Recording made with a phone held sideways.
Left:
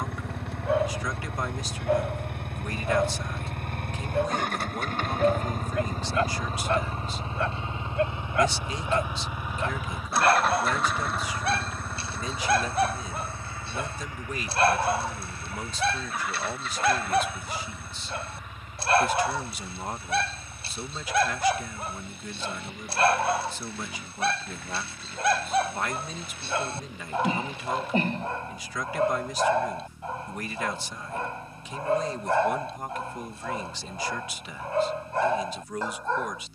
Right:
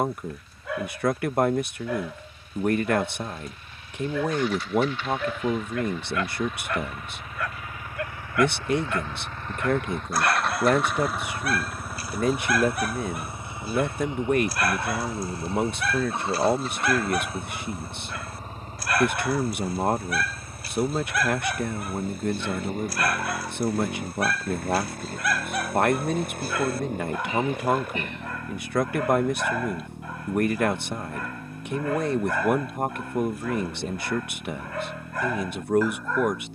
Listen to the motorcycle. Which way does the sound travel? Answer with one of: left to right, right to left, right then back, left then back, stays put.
left to right.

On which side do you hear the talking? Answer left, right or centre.
right.